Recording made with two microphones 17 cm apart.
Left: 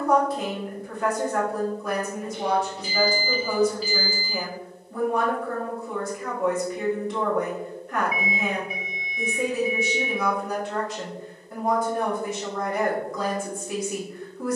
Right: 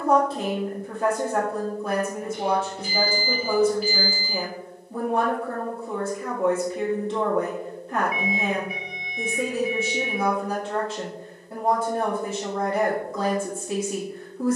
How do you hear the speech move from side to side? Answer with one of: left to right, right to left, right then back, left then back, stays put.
stays put.